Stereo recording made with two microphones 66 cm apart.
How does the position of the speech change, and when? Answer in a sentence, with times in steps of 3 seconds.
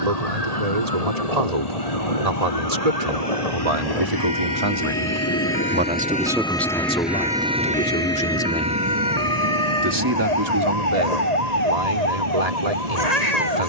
You can hear the speech on the right from 0 s, in the centre from 6 s and on the right from 9 s.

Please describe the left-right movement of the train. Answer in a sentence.
You can hear the train move from left to right.